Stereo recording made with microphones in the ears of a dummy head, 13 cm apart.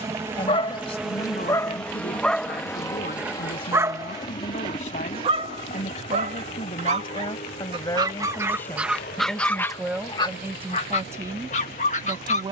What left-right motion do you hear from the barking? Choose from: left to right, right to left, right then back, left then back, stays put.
right then back.